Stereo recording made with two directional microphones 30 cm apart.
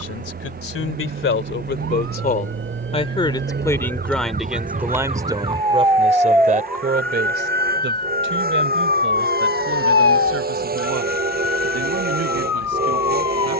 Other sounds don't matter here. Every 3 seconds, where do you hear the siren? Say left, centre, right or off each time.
right, right, centre, left, left.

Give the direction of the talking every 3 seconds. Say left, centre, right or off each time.
left, centre, right, right, right.